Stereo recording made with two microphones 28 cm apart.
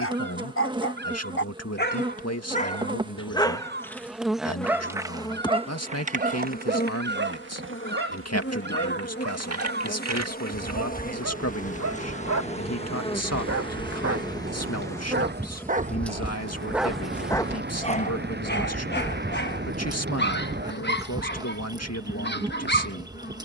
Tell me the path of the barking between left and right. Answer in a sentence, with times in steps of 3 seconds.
In this clip you hear the barking on the left from 0 s, in the centre from 3 s, on the right from 6 s, in the centre from 15 s and on the left from 18 s.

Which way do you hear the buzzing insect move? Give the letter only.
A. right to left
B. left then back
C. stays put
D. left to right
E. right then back
B.